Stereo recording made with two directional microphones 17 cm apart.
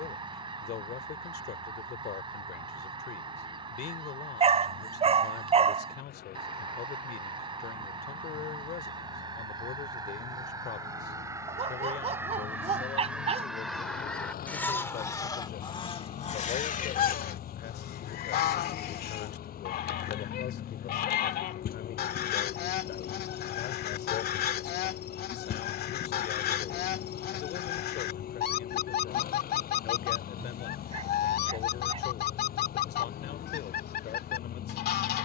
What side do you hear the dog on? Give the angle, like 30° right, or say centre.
40° right.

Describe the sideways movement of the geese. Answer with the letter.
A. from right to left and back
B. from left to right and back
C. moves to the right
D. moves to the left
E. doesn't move
D.